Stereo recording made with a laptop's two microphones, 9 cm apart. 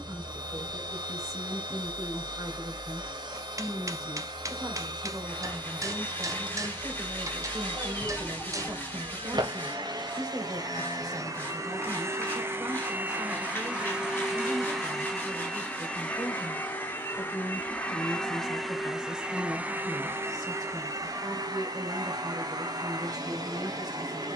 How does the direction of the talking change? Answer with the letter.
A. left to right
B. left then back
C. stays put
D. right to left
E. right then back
C.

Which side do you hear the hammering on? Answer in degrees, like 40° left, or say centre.
40° right.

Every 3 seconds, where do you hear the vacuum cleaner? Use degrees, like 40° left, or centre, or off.
50° right, 50° right, 50° right, 50° right, 20° right, 20° left, 10° right, 50° right.